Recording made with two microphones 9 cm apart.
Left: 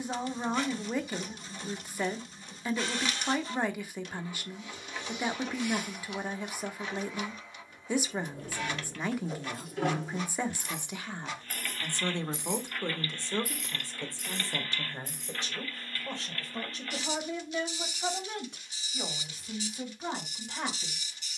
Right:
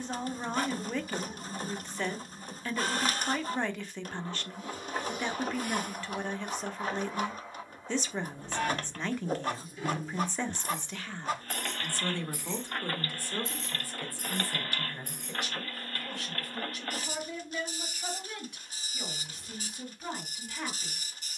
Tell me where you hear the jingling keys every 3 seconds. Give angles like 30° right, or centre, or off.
off, off, 80° left, 60° left, 20° right, 60° right, off.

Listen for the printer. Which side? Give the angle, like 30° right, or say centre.
40° right.